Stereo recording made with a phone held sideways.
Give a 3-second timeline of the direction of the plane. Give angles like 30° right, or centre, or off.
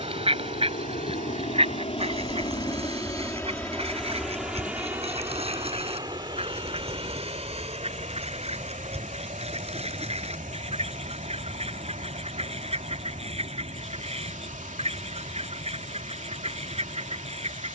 40° left, centre, 30° right, 50° right, 50° right, 60° right.